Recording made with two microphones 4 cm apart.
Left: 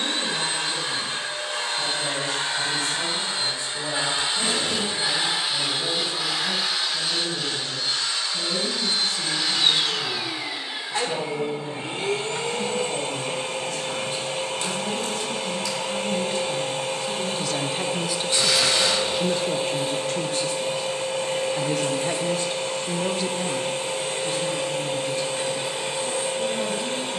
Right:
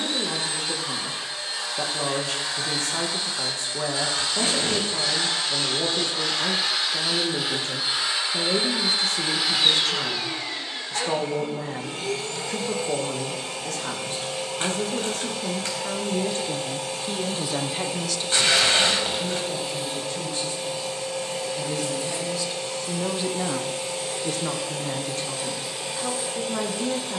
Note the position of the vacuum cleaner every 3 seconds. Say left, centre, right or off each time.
left, left, centre, centre, left, left, left, left, left.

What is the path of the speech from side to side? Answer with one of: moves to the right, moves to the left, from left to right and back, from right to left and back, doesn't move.
from right to left and back.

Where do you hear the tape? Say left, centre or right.
right.